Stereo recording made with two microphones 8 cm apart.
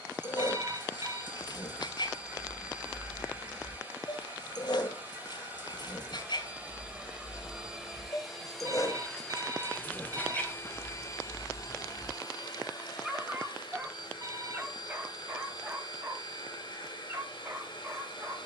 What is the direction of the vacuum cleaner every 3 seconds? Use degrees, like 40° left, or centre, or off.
20° right, 20° right, 10° right, 30° left, 60° left, 70° left.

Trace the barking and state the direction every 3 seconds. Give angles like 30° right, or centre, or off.
60° left, 60° left, 50° left, 20° left, 10° right, 30° right.